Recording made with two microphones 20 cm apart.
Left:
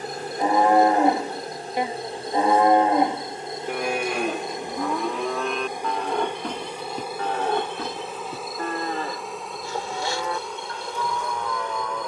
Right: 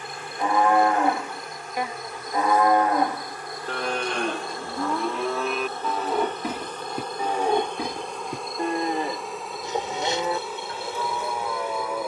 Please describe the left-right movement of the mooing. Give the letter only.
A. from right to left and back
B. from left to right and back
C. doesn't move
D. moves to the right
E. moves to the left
D.